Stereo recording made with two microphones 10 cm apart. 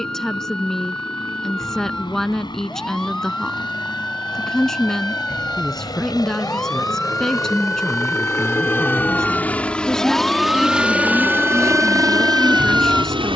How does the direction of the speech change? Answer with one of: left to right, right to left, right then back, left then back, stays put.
stays put.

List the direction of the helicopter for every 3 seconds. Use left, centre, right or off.
left, left, left, centre, right.